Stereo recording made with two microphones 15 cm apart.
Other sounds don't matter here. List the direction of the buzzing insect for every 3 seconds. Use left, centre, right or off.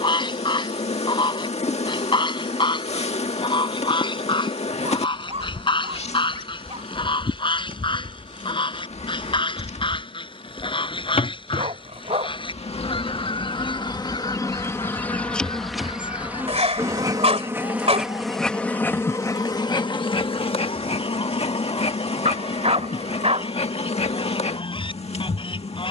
left, left, left, left, left, centre, left, left, left.